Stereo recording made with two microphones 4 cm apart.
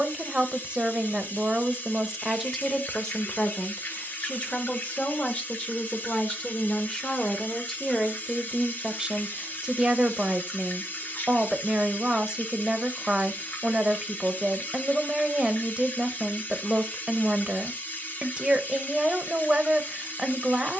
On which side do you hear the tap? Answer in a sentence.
You can hear the tap on the left.